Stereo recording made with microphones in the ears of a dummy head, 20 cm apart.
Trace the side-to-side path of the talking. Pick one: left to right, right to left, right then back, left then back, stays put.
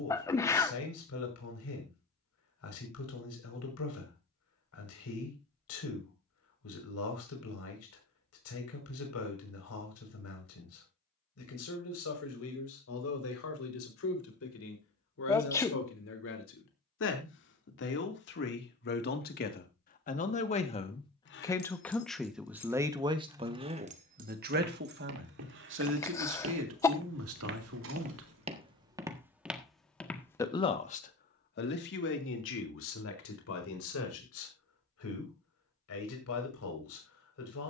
right then back.